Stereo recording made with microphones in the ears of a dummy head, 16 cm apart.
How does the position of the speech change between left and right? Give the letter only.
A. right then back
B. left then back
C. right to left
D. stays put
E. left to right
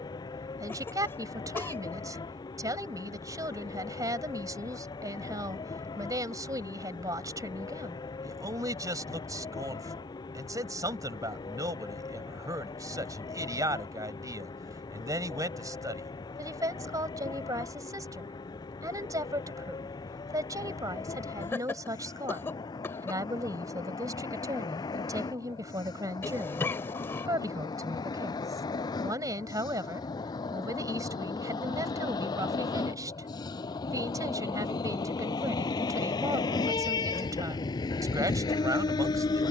D.